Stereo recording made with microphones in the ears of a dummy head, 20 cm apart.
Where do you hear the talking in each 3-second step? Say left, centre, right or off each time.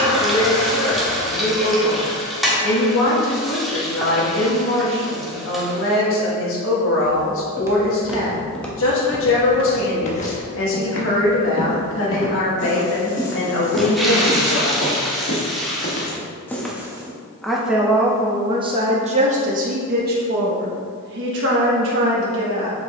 left, left, left, left, left, centre, right, right.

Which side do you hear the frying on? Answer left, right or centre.
centre.